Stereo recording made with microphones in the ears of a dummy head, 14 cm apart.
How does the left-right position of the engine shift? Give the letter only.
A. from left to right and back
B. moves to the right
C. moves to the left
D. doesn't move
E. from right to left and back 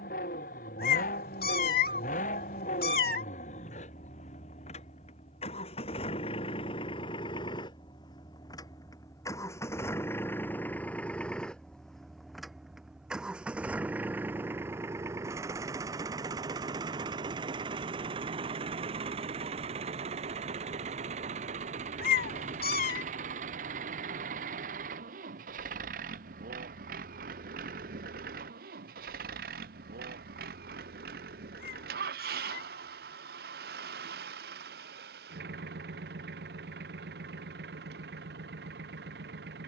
B.